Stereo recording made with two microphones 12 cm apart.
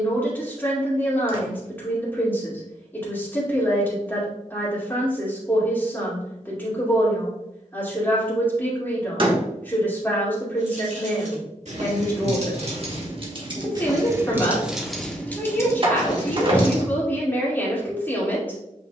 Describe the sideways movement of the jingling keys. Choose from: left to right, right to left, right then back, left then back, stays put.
right to left.